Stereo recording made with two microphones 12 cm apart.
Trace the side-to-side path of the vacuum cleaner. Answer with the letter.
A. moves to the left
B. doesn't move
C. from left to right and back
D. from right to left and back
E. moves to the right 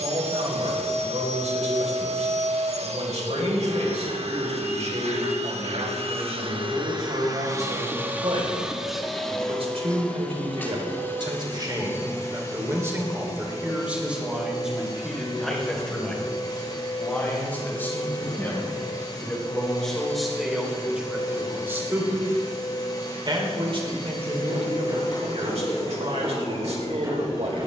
A.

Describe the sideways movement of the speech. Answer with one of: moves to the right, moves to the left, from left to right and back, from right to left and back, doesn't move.
from right to left and back.